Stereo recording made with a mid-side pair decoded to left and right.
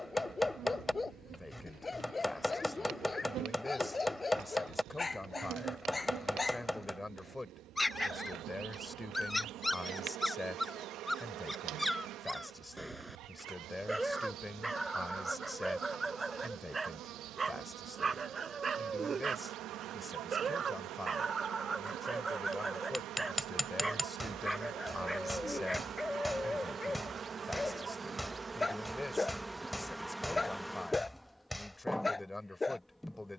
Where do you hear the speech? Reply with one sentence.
In this clip you hear the speech in the centre.